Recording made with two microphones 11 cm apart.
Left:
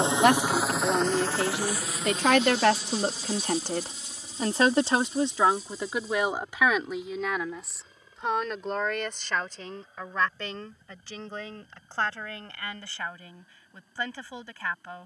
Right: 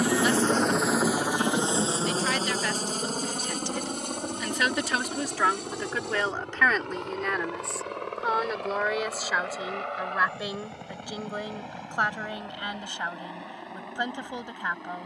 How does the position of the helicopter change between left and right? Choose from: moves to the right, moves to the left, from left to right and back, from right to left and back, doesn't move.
moves to the right.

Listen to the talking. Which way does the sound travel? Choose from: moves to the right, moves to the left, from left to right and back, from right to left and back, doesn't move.
moves to the right.